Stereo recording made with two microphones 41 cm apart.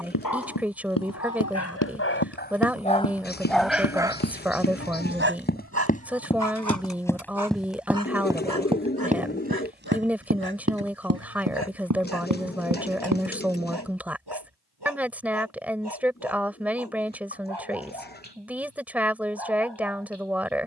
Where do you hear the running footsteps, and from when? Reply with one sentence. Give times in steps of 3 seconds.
You can hear the running footsteps on the left from 0 s, in the centre from 6 s, on the right from 9 s and not at all from 15 s.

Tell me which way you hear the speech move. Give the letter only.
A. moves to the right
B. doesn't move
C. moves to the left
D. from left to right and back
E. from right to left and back
B.